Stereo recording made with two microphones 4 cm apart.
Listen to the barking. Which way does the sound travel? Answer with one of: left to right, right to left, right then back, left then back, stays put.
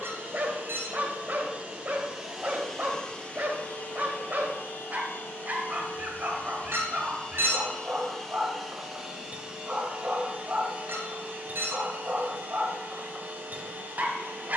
stays put.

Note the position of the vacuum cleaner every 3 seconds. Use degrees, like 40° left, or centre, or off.
30° right, 40° left, 20° left, 30° right, 40° right.